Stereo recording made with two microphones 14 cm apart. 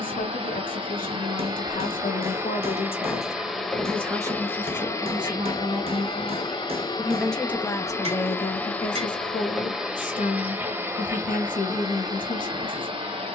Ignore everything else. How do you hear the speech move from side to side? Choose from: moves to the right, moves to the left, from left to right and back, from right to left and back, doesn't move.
from left to right and back.